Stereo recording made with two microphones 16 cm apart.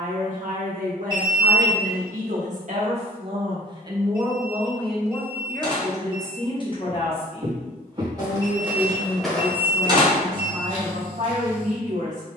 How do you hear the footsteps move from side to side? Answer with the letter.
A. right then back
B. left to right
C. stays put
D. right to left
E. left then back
D.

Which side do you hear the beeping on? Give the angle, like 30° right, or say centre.
30° right.